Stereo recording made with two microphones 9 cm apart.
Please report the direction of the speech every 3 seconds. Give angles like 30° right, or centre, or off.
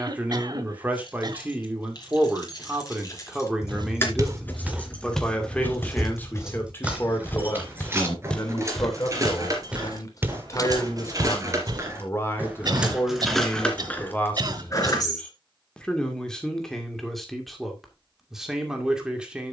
20° right, centre, 30° left, 40° left, 20° left, 10° left, 10° right.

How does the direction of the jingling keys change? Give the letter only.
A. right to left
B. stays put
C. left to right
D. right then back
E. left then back
D.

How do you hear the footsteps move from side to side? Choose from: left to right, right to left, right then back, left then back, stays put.
left then back.